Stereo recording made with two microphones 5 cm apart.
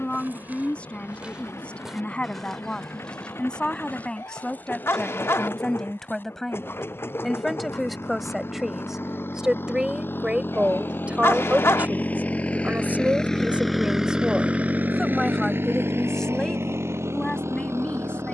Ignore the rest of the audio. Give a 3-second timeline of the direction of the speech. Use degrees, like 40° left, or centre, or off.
30° left, 20° left, centre, 30° right, 30° right, 10° left.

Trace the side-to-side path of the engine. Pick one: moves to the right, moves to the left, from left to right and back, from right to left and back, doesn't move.
moves to the right.